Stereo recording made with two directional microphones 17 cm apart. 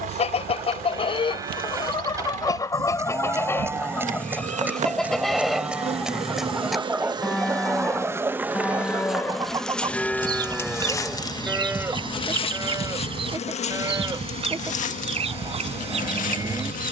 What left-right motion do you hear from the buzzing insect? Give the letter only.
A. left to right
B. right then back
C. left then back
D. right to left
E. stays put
D.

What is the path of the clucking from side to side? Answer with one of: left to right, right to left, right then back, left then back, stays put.
left to right.